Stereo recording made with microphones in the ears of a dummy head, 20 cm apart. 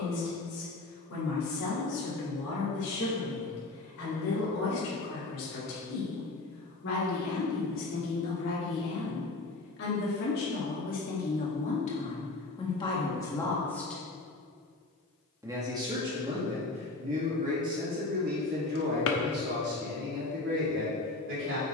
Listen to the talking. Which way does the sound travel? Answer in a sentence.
You can hear the talking move to the right.